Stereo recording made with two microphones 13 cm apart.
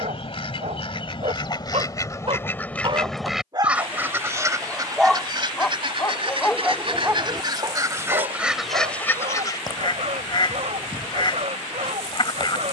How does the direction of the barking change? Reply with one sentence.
In this clip you hear the barking go left and come back.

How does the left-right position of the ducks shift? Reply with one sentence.
In this clip you hear the ducks move from left to right and back again.